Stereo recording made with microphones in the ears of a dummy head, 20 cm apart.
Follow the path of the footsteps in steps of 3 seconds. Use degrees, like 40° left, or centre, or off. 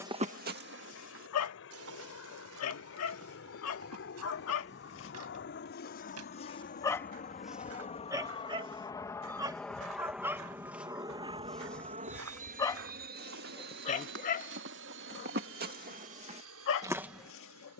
60° right, 80° right, 70° right, 70° right, 60° right, 30° right.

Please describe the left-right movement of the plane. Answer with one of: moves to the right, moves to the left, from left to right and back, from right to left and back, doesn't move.
moves to the right.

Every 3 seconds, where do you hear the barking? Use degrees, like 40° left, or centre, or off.
70° left, 60° left, centre, 10° right, 30° left, 60° left.